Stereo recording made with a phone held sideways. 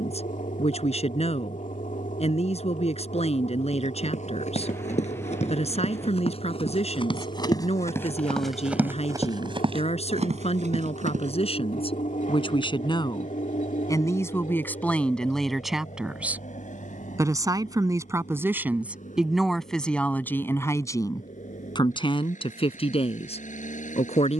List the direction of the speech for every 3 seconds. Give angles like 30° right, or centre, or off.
50° left, 50° left, 50° left, 50° left, 30° left, 10° right, centre, 40° left.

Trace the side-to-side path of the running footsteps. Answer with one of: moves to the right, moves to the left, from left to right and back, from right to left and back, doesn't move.
moves to the right.